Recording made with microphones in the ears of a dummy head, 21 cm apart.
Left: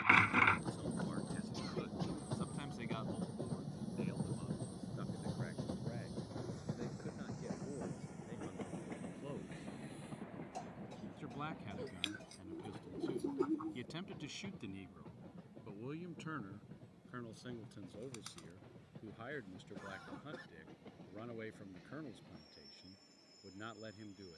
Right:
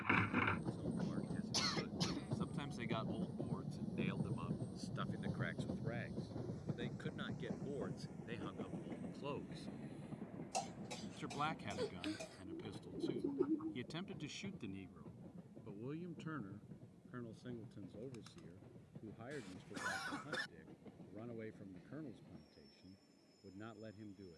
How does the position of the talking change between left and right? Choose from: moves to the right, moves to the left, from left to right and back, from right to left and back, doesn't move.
from left to right and back.